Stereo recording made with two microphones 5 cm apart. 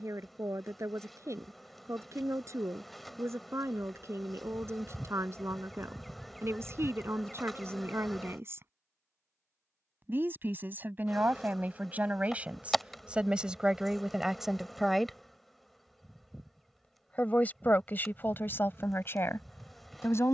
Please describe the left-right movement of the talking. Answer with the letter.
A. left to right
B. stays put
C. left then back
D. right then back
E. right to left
E.